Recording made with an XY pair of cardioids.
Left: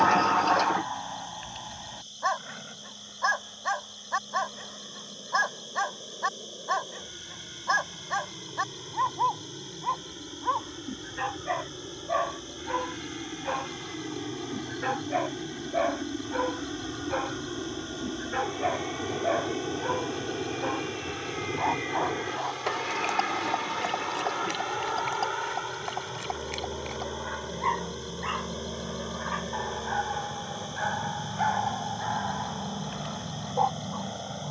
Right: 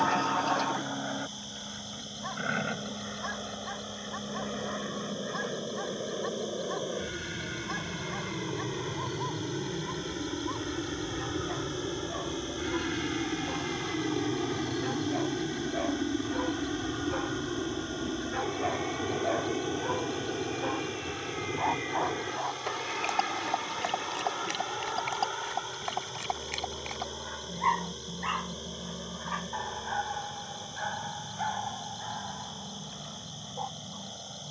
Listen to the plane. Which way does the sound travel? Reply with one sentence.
In this clip you hear the plane go from the right side to the left.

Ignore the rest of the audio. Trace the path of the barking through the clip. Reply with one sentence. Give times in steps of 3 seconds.
You can hear the barking on the left from 0 s, in the centre from 21 s and on the left from 30 s.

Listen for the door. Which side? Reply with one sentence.
In this clip you hear the door on the left.